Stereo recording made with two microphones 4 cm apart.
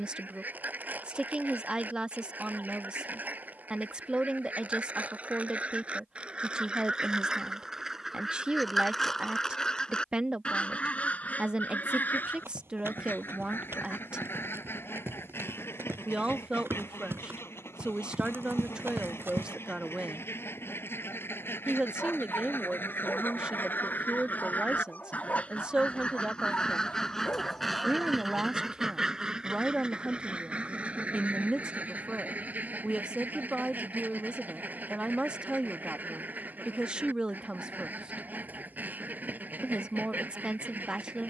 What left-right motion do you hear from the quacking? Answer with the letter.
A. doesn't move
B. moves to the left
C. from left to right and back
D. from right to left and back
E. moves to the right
D.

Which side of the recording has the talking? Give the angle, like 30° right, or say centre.
20° right.